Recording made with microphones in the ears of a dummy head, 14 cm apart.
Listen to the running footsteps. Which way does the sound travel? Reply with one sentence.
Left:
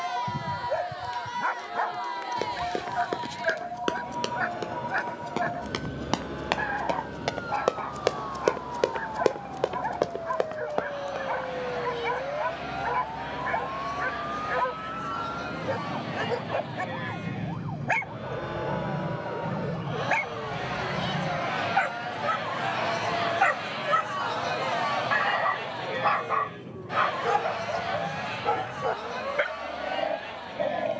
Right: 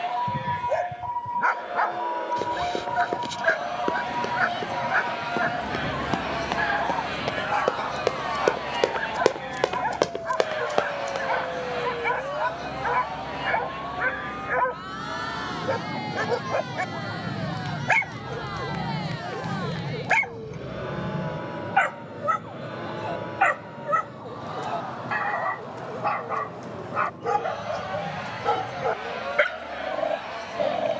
In this clip you hear the running footsteps move to the right.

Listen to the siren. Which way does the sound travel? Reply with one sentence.
In this clip you hear the siren go from the right side to the left.